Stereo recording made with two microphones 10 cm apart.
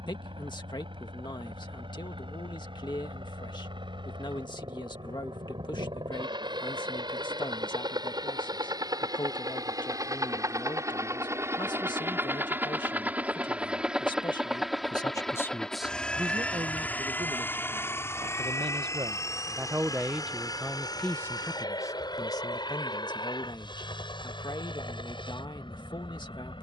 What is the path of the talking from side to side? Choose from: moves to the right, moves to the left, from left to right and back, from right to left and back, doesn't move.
from left to right and back.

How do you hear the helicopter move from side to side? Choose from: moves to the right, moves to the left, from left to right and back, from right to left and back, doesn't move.
moves to the left.